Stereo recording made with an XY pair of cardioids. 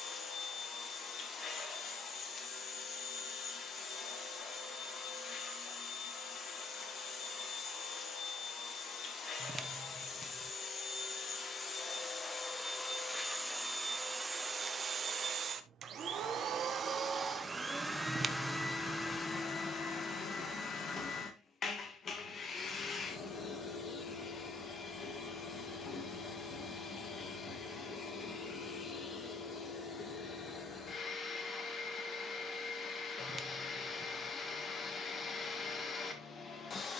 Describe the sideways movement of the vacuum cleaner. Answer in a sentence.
In this clip you hear the vacuum cleaner go right and come back.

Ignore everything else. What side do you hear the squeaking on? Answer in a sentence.
In this clip you hear the squeaking on the right.